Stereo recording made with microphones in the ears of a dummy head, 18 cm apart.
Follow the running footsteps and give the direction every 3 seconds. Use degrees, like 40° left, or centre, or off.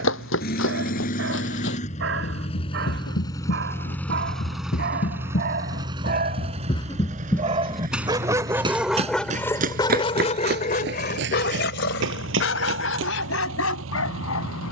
70° left, 50° left, 10° left, 50° right, 70° right.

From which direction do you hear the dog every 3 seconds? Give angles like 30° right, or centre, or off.
60° right, 50° right, 30° right, 40° left, 70° left.